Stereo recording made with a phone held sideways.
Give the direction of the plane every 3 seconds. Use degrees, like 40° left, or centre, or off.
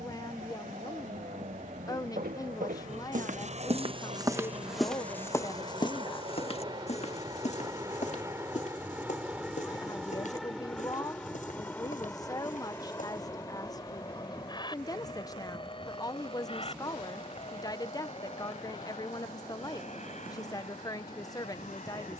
60° right, 50° right, 20° right, centre, 20° left, 30° left, 40° left, 50° left.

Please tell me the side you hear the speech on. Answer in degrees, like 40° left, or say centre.
20° left.